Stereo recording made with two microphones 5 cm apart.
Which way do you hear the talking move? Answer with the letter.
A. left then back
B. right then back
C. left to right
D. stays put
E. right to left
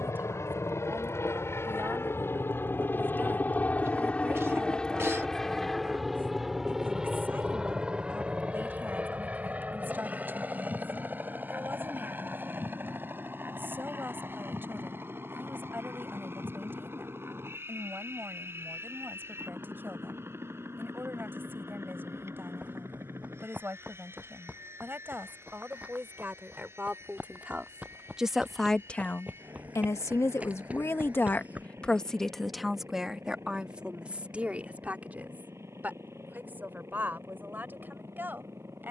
A.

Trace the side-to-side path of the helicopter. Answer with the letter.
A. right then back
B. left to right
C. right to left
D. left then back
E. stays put
B.